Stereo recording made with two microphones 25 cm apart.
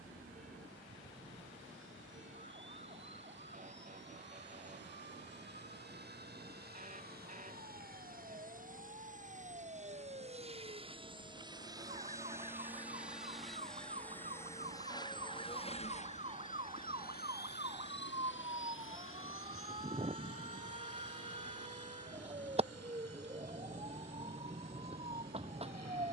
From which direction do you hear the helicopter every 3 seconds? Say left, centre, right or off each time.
right, right, right, right, centre, left, left, left, left.